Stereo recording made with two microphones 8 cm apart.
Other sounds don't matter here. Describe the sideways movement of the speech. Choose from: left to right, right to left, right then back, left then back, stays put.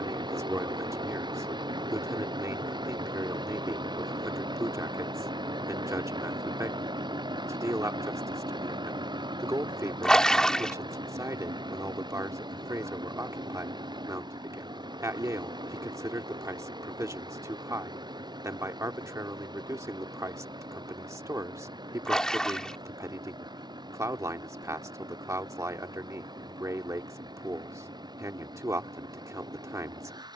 stays put.